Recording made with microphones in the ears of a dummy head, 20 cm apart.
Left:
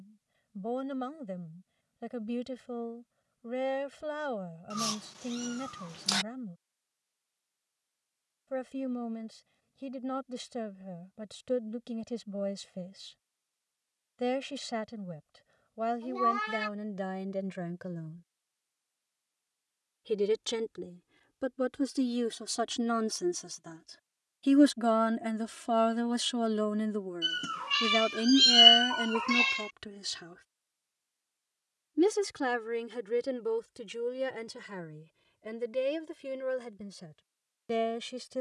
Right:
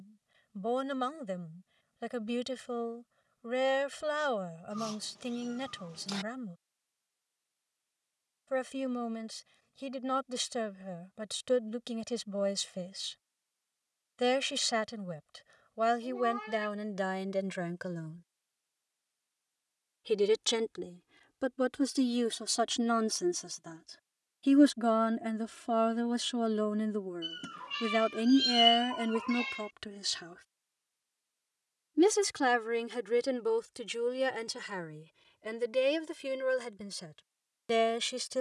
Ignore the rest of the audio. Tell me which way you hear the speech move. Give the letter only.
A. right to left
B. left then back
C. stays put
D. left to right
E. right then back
B.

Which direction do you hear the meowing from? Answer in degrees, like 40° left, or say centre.
50° left.